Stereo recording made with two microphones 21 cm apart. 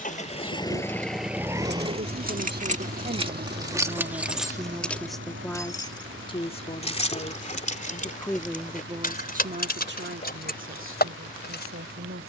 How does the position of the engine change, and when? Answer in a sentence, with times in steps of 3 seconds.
In this clip you hear the engine in the centre from 0 s and on the right from 3 s.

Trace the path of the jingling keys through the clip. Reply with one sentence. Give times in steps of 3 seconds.
In this clip you hear the jingling keys on the right from 0 s, in the centre from 3 s and on the left from 6 s.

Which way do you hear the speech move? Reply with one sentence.
You can hear the speech move from right to left and back again.